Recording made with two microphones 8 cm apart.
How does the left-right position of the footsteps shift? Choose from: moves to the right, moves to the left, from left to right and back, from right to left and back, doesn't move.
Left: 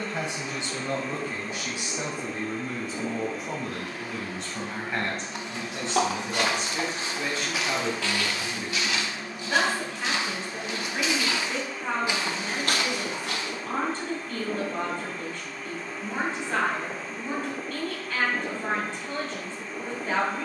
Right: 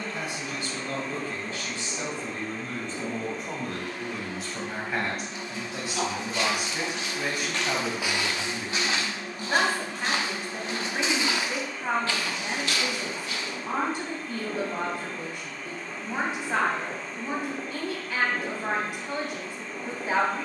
from left to right and back.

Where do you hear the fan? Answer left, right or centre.
centre.